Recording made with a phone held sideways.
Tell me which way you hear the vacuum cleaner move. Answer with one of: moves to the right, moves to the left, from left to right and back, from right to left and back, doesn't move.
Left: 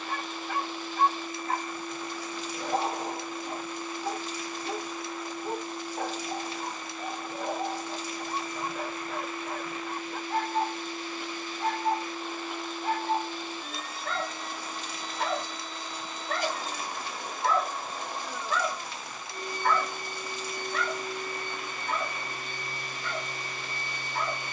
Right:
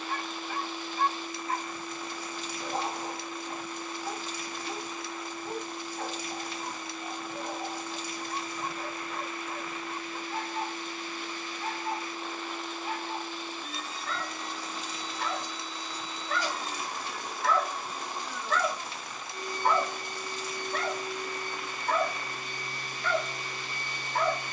doesn't move.